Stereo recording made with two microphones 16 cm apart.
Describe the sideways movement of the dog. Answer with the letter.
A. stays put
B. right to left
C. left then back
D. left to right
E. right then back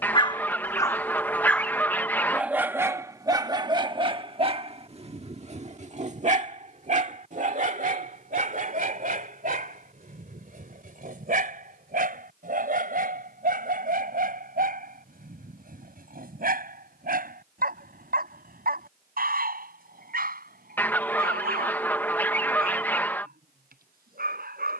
D.